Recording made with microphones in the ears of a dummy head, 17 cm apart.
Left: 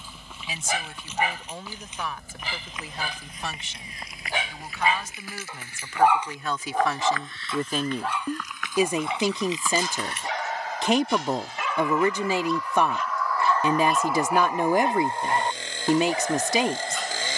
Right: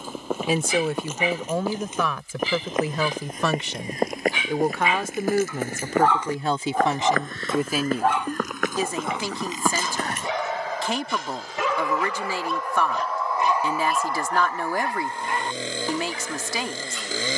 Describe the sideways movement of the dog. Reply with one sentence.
In this clip you hear the dog go right and come back.